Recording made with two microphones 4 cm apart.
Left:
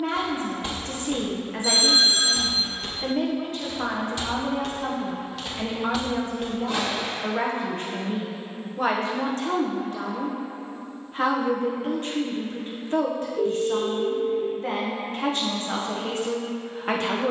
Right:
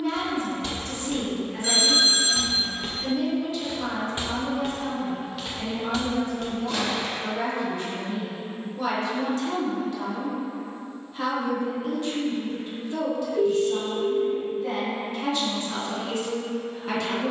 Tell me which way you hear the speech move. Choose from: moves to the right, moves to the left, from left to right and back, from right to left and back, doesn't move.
doesn't move.